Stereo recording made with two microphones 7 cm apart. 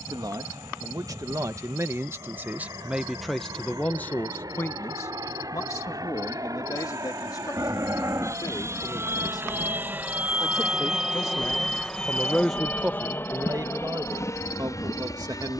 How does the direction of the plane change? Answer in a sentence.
In this clip you hear the plane travel towards the left.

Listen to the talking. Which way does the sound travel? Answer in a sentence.
You can hear the talking go left and come back.